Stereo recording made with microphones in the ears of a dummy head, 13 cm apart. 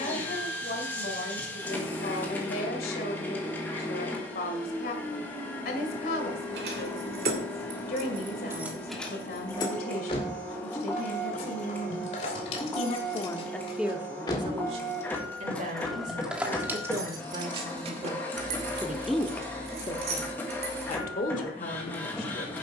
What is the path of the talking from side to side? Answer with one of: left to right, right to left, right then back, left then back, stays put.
right then back.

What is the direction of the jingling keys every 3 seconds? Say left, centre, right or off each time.
off, off, right, left, left, centre, right, off.